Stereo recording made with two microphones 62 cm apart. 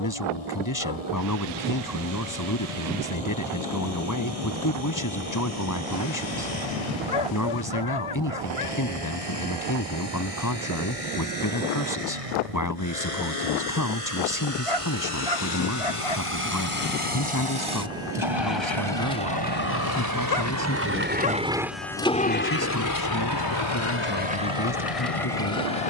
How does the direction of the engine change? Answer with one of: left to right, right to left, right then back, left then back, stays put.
right to left.